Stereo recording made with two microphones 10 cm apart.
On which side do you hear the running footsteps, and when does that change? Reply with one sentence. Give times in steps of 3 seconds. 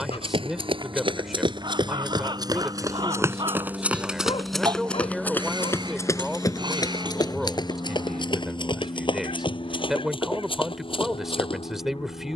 You can hear the running footsteps on the right from 0 s, in the centre from 3 s and on the left from 6 s.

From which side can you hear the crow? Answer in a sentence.
You can hear the crow on the right.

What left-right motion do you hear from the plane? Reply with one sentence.
In this clip you hear the plane go from the right side to the left.